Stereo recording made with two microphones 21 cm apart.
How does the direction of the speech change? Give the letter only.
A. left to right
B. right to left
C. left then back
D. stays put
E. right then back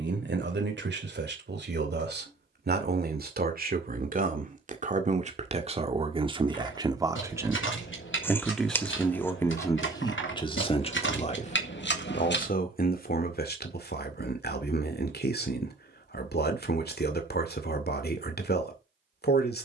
B.